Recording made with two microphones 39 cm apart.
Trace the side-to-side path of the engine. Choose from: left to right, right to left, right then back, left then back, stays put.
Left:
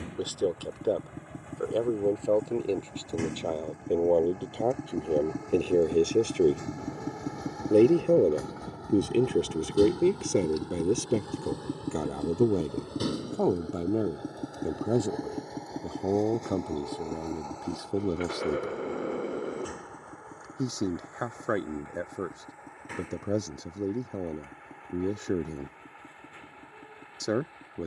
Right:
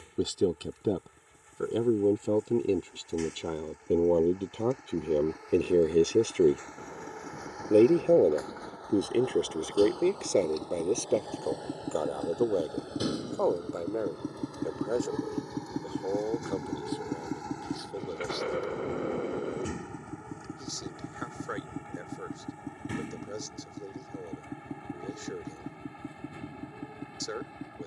left to right.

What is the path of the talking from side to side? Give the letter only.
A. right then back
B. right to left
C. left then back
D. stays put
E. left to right
B.